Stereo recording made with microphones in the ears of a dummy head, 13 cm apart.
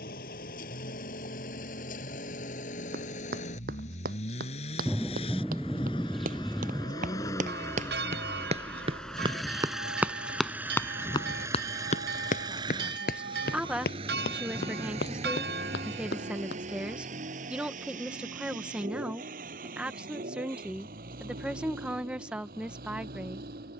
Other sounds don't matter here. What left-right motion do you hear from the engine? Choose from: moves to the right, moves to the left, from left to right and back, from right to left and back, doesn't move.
moves to the right.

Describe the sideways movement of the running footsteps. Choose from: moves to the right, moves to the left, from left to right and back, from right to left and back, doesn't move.
moves to the left.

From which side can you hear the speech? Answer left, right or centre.
centre.